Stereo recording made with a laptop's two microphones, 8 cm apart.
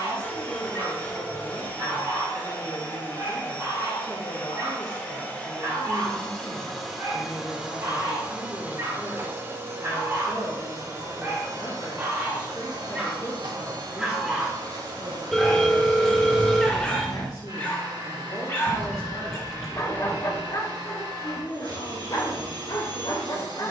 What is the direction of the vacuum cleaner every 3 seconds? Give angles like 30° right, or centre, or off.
20° left, 20° left, 10° right, 40° right, 60° right, 60° right, 60° right, 60° right.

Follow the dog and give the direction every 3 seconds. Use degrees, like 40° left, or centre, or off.
50° right, 40° right, 40° right, 30° right, 10° right, 10° left, 40° left, 60° left.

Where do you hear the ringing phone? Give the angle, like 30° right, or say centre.
centre.